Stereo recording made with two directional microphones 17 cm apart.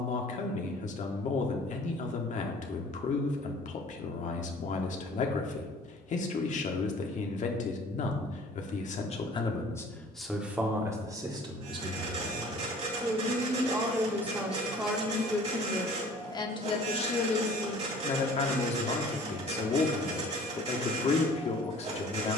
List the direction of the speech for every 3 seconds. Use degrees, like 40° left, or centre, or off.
50° left, 50° left, 50° left, centre, 20° right, 20° left, 40° left, 40° left.